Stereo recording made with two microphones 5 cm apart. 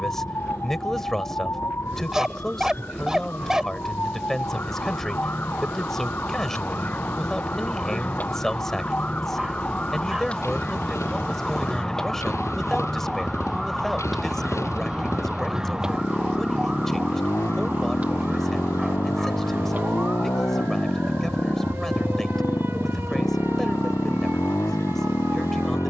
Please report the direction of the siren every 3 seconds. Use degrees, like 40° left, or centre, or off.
60° left, 50° left, 40° left, 20° left, centre, 20° right, 30° right, 50° right, 50° right.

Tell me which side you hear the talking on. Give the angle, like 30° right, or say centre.
10° left.